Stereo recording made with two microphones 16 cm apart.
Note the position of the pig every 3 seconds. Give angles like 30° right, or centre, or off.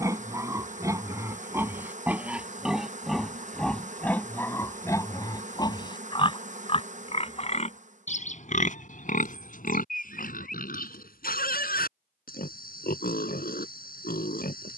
10° right, 10° left, 40° left, 60° left, 70° left.